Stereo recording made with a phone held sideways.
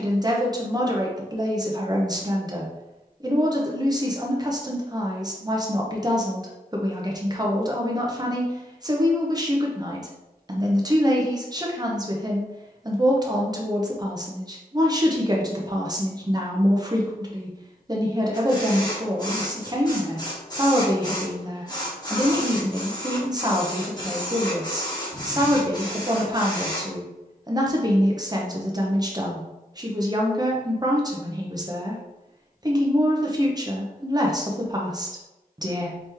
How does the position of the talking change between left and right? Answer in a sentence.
In this clip you hear the talking stay put.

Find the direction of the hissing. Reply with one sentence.
You can hear the hissing on the left.